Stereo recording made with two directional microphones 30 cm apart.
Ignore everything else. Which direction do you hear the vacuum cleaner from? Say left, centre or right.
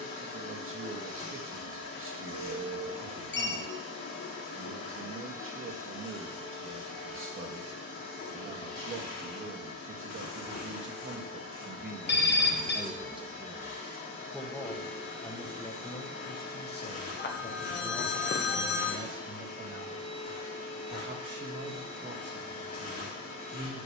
left.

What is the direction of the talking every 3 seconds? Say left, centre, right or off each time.
right, right, right, right, centre, left, right, right.